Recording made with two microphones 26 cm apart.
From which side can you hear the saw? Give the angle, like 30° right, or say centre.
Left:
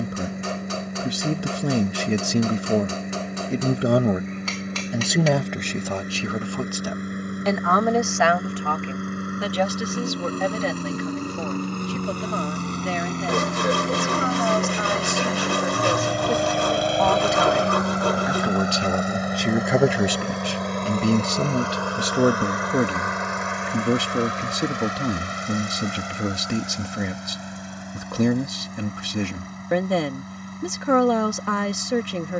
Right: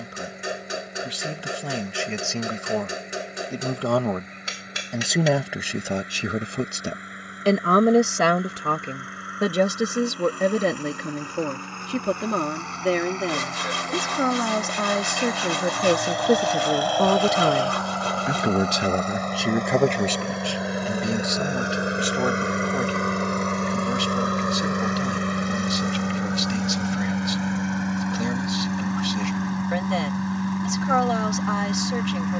60° left.